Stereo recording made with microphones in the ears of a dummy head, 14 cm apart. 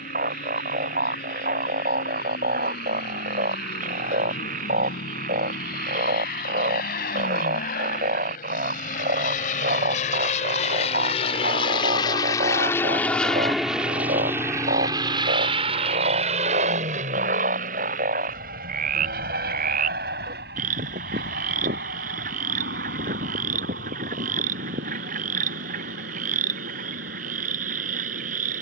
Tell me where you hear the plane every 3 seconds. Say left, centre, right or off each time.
left, left, left, left, centre, right, right, right, right, right.